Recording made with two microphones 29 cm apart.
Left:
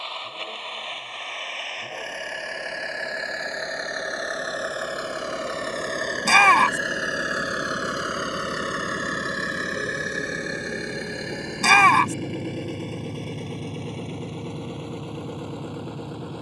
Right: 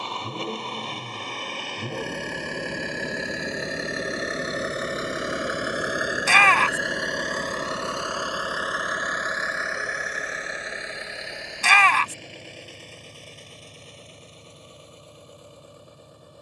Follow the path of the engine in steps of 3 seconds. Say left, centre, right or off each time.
right, right, centre, left, left, left.